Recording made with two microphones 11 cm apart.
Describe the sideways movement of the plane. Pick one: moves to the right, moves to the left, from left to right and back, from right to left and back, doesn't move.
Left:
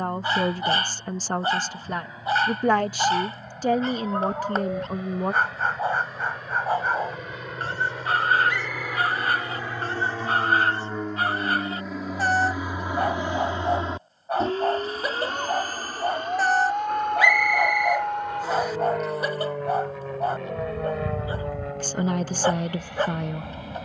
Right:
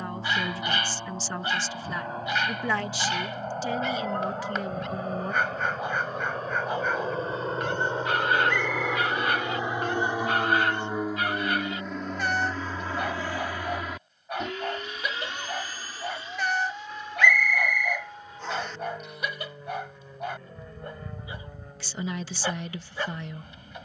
moves to the left.